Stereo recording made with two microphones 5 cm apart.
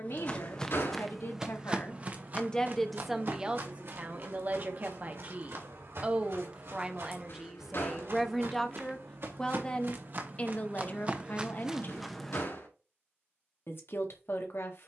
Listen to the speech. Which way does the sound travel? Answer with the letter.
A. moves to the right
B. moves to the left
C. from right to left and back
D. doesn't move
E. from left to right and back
E.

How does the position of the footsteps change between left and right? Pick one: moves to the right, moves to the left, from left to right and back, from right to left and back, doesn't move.
from left to right and back.